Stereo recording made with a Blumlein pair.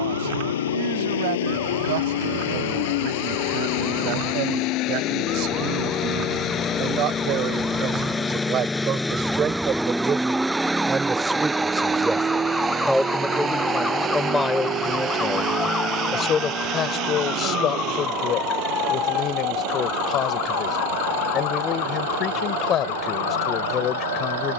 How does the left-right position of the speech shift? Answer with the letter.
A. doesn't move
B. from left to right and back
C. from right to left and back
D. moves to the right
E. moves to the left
E.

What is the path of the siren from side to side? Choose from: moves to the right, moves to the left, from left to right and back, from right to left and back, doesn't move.
moves to the left.